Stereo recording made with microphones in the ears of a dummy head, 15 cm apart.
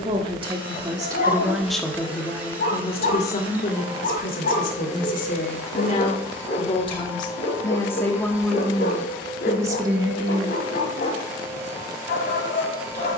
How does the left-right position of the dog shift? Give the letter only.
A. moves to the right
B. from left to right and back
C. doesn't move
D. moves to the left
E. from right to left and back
C.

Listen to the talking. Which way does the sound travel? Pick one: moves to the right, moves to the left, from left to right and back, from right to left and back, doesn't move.
from right to left and back.